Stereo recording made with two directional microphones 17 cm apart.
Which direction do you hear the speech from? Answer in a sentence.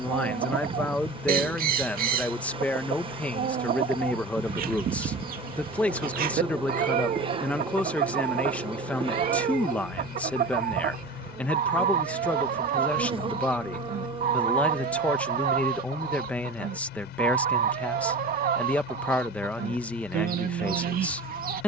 You can hear the speech in the centre.